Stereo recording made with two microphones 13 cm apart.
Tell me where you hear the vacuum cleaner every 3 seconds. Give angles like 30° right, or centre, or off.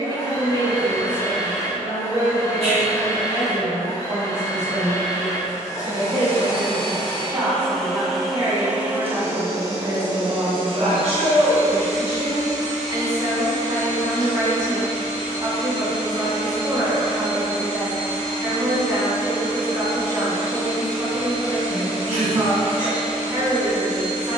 20° left, 20° left, 10° left, 40° right, 70° right, 70° right, 70° right, 70° right.